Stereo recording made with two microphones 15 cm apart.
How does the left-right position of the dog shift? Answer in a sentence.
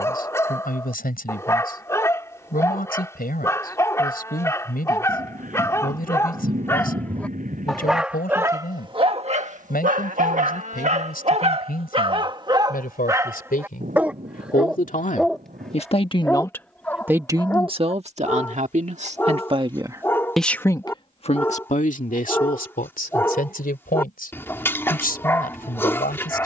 You can hear the dog go right and come back.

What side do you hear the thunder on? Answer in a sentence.
In this clip you hear the thunder on the right.